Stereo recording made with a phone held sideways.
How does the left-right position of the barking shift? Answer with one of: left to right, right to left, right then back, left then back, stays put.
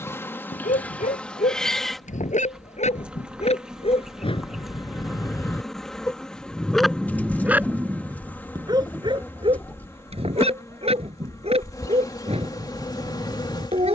left to right.